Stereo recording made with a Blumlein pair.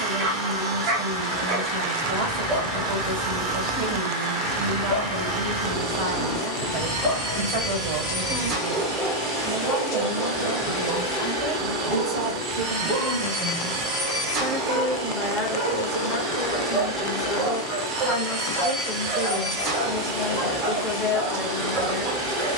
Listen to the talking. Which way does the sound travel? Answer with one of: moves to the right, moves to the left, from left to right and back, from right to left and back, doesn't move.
moves to the left.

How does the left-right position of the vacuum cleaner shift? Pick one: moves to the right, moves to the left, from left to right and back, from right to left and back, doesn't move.
doesn't move.